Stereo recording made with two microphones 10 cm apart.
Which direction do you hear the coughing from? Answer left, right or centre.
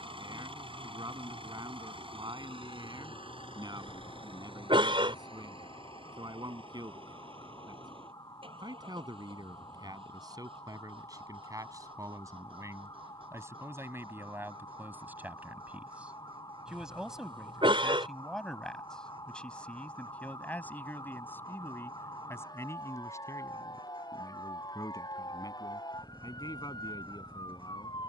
right.